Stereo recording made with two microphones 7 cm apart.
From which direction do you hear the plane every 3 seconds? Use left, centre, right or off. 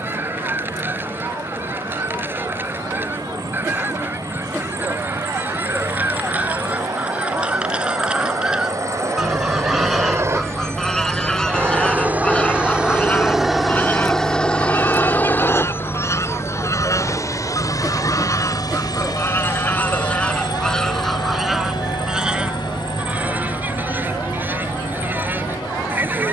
right, right, right, right, centre, left, left, left, left.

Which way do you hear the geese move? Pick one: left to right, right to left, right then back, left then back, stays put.
left then back.